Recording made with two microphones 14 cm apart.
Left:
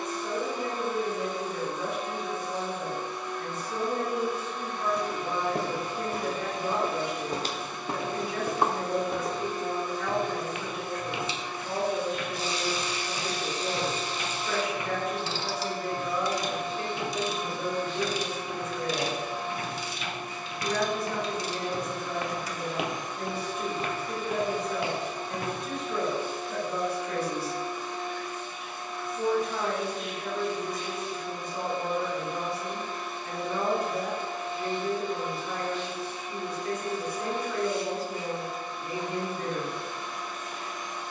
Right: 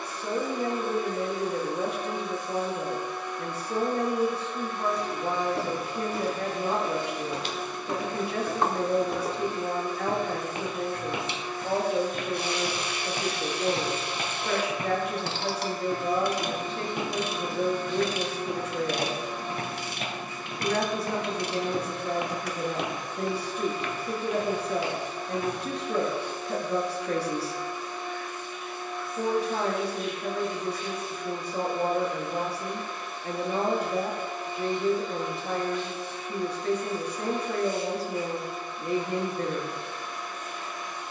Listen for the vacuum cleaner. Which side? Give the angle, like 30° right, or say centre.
80° left.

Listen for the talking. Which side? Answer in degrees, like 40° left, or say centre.
70° right.